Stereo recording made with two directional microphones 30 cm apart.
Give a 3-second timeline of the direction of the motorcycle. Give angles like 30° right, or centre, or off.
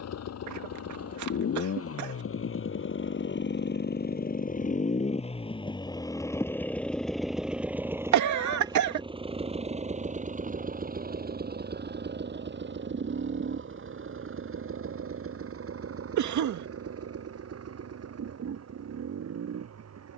50° left, 30° left, centre, 30° right, 40° right, 50° right, 50° right.